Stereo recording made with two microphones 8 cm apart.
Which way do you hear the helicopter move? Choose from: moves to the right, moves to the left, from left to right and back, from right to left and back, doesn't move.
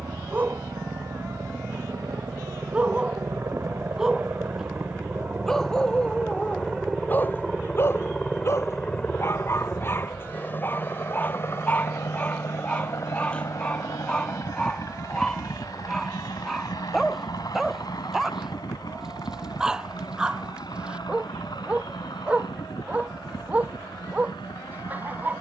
moves to the left.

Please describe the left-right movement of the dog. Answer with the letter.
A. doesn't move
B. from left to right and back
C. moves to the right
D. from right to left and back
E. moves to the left
D.